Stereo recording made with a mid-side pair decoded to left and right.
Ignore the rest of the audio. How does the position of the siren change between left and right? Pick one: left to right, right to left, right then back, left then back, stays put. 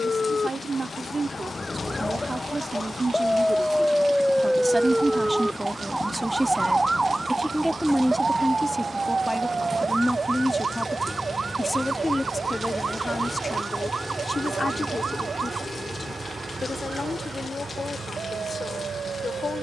left to right.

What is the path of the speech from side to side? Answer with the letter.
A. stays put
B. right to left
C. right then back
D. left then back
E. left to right
B.